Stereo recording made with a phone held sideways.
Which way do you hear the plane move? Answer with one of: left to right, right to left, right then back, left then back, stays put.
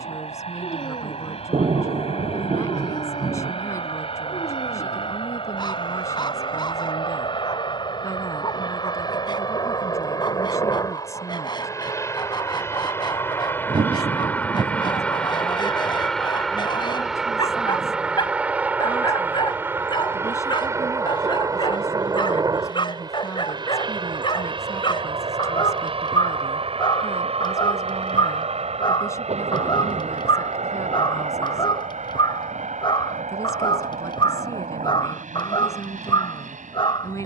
left to right.